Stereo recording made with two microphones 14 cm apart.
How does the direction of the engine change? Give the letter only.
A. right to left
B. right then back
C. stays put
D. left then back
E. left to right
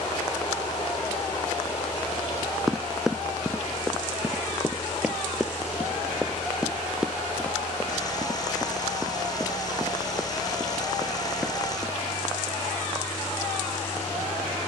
C.